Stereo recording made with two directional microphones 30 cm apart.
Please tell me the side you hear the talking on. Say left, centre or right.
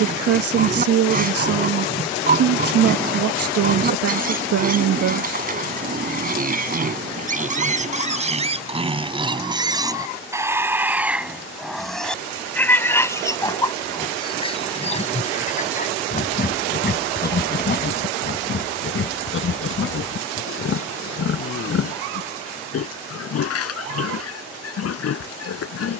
right.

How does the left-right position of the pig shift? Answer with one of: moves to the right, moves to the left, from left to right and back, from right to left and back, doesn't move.
moves to the left.